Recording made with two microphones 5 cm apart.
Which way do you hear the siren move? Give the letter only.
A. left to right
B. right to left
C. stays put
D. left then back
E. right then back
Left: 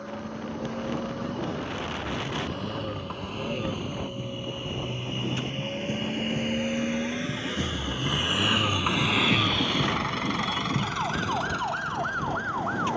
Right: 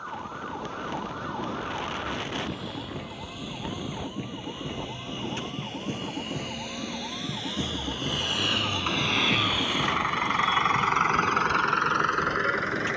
B.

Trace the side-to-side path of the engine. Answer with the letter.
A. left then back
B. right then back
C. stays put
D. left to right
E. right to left
D.